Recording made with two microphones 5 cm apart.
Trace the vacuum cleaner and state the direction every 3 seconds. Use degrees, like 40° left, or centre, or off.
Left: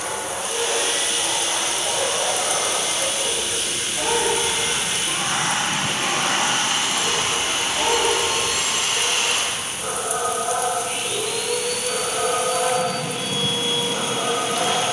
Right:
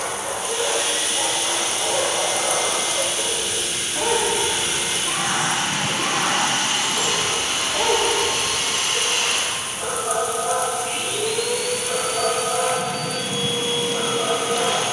50° left, 50° left, 20° left, 20° right, 40° right.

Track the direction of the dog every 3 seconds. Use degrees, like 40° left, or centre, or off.
80° right, 70° right, 50° right, 20° right, centre.